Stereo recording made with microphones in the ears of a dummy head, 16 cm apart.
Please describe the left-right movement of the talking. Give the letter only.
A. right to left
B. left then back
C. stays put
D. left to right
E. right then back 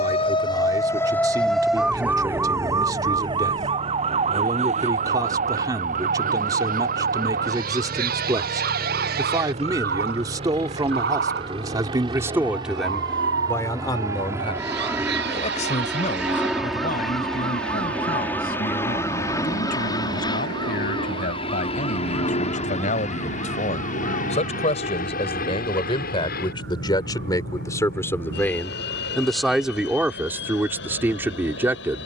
B.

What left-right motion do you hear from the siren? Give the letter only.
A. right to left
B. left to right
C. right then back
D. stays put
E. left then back
B.